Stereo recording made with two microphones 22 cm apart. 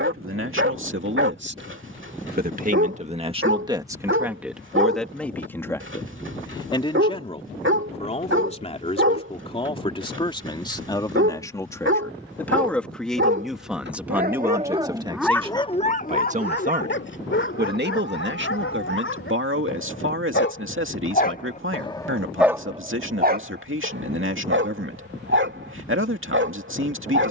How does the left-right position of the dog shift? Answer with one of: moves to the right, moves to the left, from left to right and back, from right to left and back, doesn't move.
from right to left and back.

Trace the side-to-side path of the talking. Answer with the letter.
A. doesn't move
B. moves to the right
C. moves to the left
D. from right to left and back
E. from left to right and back
D.